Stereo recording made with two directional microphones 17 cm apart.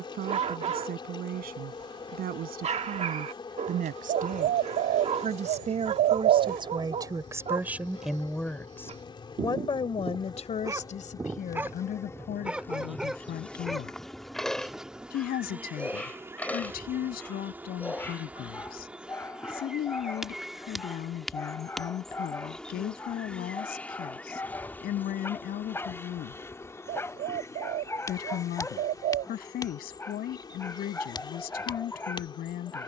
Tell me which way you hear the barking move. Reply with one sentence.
In this clip you hear the barking travel towards the left.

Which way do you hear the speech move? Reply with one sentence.
In this clip you hear the speech go from the right side to the left.